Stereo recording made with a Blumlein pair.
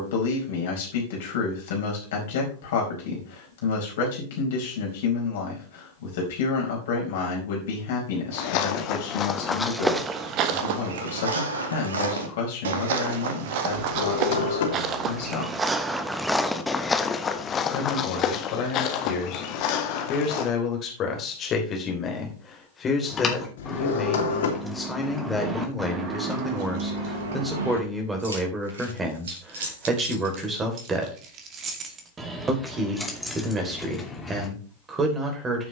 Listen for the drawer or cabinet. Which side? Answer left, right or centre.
left.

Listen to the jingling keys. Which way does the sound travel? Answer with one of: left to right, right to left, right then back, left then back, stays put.
right then back.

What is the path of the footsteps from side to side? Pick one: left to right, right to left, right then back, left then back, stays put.
right then back.